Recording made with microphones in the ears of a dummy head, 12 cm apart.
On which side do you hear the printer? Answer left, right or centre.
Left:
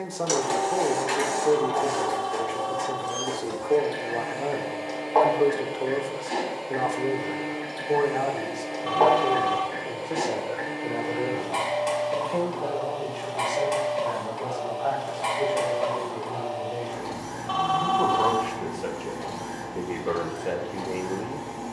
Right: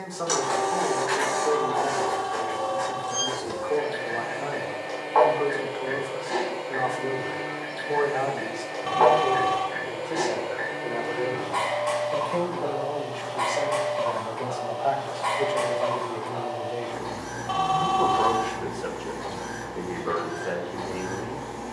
left.